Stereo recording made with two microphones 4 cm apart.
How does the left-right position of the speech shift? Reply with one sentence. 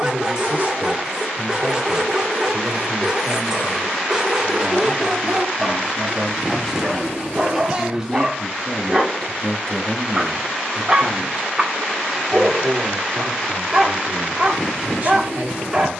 In this clip you hear the speech move from right to left and back again.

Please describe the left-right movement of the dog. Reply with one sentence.
You can hear the dog stay in one place.